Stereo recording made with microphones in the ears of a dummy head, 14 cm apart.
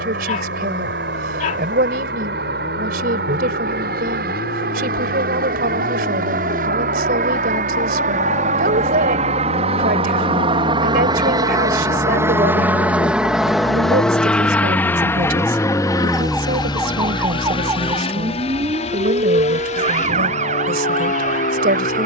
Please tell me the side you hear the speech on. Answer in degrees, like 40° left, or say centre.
60° right.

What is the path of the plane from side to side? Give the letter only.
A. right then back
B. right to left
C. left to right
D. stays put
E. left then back
B.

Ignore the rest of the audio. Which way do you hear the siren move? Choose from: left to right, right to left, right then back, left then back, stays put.
left to right.